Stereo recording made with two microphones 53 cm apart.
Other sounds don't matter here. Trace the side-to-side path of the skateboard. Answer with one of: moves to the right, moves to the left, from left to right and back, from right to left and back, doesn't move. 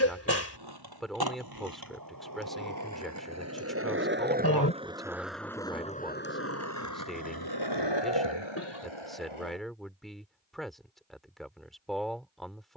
moves to the left.